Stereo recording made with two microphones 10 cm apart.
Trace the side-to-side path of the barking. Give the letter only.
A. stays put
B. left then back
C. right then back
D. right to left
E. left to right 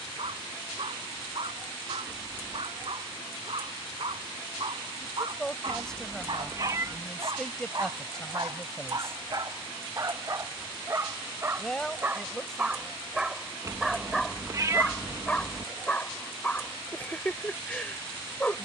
D.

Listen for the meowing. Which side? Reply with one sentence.
In this clip you hear the meowing on the right.